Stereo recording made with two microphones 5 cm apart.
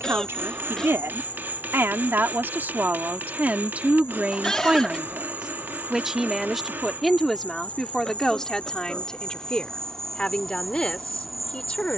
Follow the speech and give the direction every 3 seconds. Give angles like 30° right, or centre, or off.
50° right, 30° right, centre, 20° left.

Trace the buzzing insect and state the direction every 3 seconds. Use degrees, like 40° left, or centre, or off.
30° left, 50° left, 30° left, 10° left.